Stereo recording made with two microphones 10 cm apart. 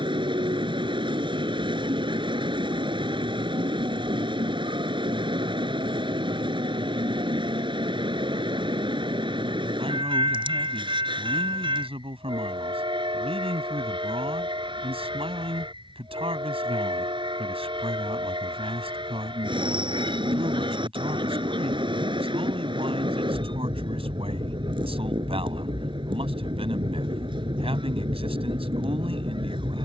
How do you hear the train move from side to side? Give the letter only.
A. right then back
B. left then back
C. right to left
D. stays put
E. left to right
D.